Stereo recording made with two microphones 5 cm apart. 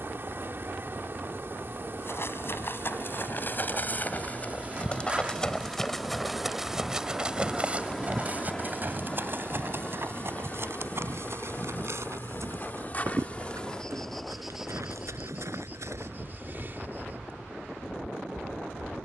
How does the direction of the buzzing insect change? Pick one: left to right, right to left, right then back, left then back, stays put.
left then back.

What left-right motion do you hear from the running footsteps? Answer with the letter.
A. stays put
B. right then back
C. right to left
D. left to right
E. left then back
D.